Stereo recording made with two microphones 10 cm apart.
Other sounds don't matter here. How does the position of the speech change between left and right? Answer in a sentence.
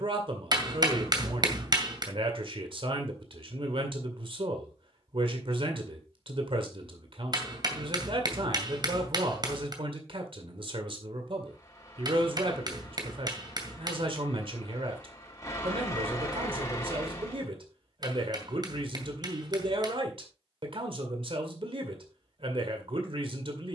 In this clip you hear the speech stay in one place.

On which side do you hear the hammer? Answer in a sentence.
In this clip you hear the hammer on the right.